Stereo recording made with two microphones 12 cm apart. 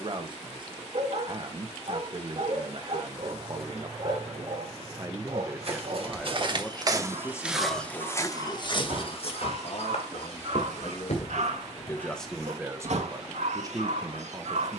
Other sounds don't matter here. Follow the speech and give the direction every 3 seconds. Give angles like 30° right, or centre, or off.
40° right, 30° right, 20° left, 40° left, 20° right.